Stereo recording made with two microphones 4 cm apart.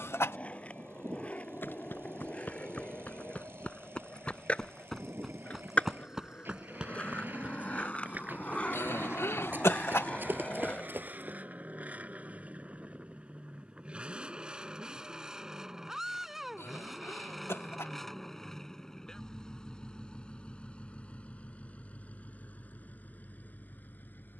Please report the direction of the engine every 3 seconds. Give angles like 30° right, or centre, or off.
60° right, 60° right, 50° right, 40° right, 20° right, centre, 20° left, 40° left.